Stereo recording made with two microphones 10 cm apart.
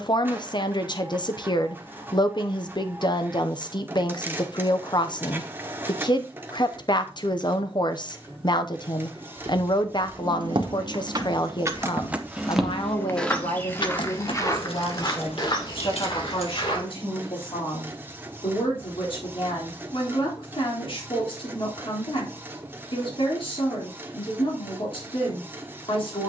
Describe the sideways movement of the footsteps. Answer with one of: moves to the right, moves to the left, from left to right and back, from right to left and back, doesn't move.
moves to the left.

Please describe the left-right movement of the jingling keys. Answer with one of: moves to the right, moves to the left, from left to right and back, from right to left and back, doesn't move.
moves to the left.